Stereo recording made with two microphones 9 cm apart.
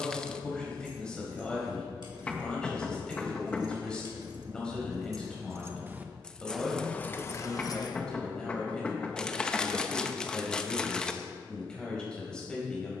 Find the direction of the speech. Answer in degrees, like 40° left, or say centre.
10° left.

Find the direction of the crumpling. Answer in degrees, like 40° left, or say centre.
10° left.